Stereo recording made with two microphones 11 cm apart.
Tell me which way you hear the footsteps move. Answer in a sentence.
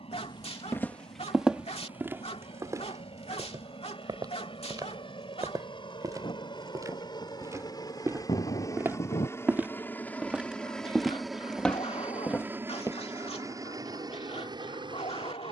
You can hear the footsteps go right and come back.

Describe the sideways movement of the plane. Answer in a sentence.
In this clip you hear the plane move from left to right.